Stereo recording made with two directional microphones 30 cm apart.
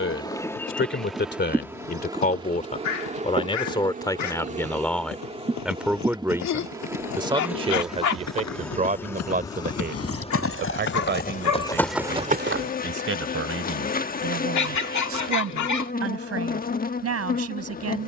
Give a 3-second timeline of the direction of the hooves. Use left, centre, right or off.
left, left, left, left, right, off.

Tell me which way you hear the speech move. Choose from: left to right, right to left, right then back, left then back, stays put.
left to right.